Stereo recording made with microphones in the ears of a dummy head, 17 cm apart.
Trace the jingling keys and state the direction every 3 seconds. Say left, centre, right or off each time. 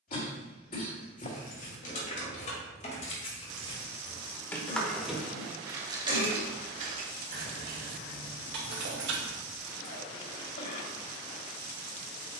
left, centre, right, right.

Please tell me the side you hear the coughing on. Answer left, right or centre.
left.